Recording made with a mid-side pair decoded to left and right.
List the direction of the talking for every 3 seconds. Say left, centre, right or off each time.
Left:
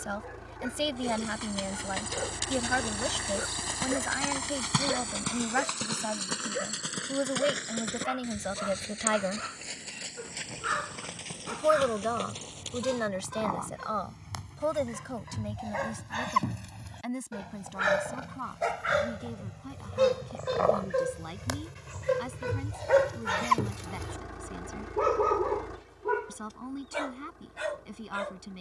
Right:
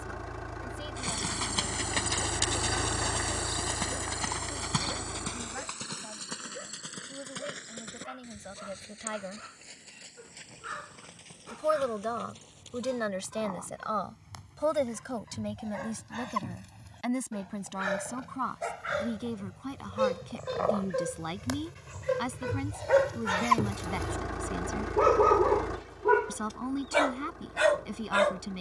left, left, left, left, centre, right, right, right, right, right.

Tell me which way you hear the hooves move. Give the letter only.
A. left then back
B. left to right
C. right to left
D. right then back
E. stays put
C.